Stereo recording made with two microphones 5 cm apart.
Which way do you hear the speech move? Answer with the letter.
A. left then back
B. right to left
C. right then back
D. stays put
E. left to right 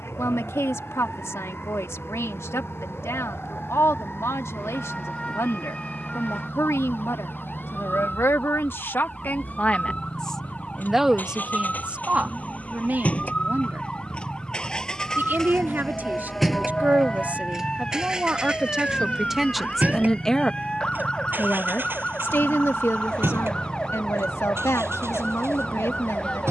C.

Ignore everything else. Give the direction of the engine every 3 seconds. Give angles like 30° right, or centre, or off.
60° left, 60° left, 50° left, 40° left, 30° left, centre, 30° right, 50° right, 60° right.